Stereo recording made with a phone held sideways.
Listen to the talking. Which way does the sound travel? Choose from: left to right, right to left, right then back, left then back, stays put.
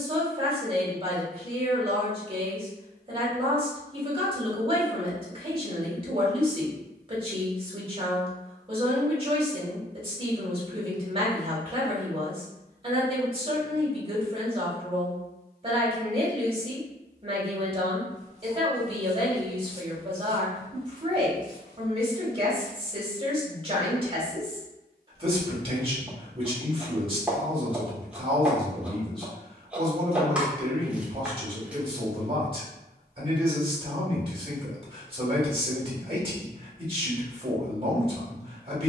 stays put.